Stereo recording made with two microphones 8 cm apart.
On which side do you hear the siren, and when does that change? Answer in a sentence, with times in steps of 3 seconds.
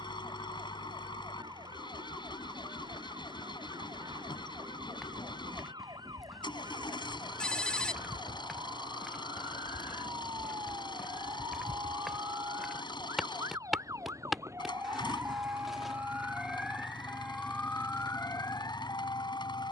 In this clip you hear the siren on the right from 0 s, in the centre from 15 s and on the left from 18 s.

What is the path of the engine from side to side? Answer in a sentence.
In this clip you hear the engine stay put.